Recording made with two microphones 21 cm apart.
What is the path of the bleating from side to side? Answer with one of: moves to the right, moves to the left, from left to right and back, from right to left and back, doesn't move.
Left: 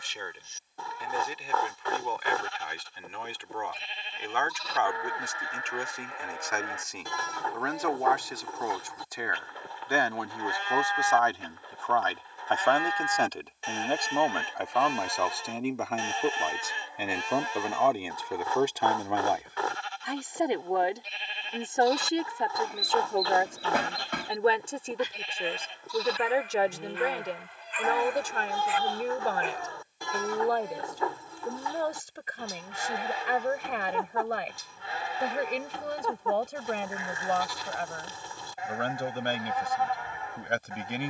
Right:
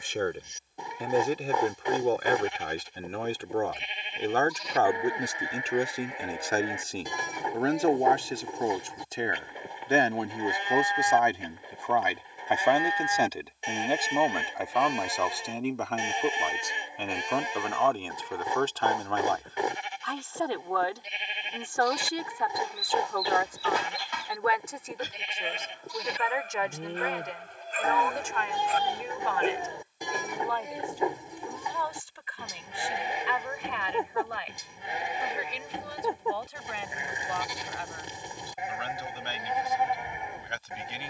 doesn't move.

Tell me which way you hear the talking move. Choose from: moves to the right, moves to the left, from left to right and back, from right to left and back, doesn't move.
moves to the left.